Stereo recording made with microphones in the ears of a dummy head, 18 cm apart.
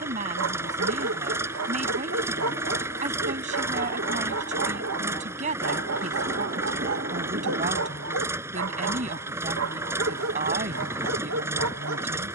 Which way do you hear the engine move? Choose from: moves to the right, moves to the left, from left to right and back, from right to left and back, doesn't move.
doesn't move.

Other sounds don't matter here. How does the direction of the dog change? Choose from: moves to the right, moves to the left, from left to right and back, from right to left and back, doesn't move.
doesn't move.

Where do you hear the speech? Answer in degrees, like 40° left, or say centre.
40° right.